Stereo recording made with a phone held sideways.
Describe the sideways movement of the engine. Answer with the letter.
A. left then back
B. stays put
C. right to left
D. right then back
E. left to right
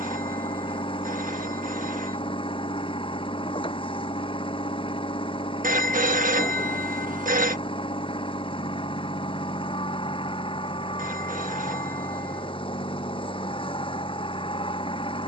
B.